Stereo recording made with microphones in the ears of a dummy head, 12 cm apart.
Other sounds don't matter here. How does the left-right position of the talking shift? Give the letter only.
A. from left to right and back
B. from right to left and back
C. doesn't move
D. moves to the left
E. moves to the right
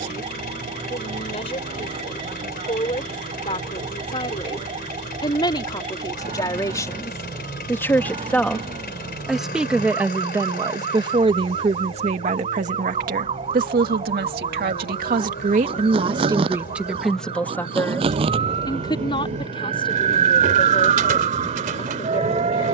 A.